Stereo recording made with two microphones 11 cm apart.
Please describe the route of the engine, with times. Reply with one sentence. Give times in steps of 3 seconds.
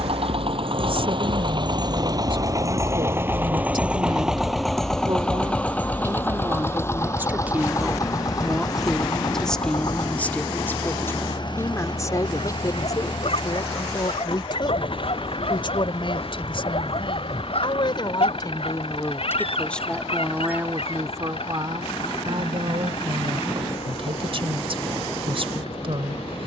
In this clip you hear the engine on the right from 0 s, in the centre from 3 s and on the left from 6 s.